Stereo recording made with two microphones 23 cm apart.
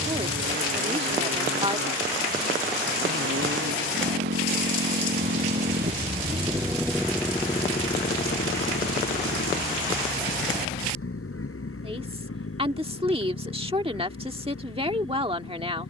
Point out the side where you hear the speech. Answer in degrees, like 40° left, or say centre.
30° right.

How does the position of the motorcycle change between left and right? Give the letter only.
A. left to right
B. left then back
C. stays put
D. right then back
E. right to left
E.